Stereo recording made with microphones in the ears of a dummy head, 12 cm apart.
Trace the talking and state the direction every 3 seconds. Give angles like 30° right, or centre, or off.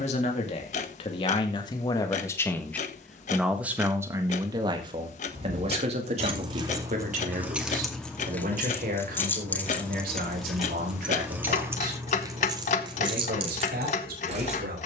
30° left, 30° right, 60° right, 70° right, 80° right.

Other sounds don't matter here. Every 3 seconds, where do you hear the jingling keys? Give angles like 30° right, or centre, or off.
off, 60° right, 10° right, centre, 40° right.